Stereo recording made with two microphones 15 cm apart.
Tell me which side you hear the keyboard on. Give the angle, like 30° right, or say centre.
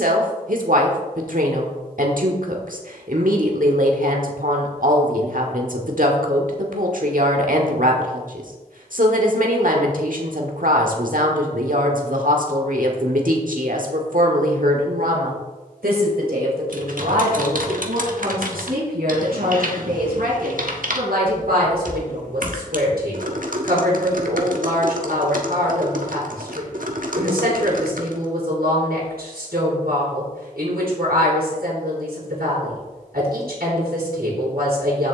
60° right.